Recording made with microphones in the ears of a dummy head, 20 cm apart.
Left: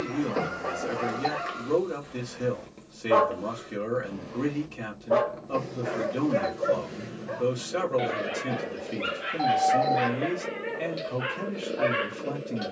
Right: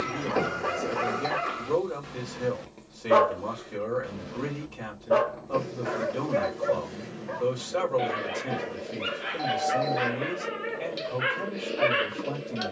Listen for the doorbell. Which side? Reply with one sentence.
In this clip you hear the doorbell on the right.